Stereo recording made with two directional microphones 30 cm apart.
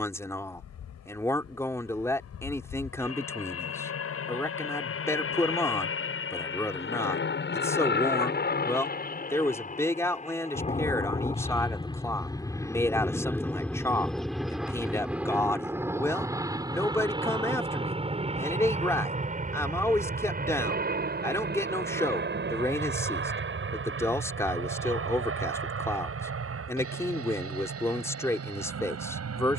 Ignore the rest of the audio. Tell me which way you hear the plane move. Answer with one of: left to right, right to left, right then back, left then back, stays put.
left to right.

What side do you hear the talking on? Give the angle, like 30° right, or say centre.
10° left.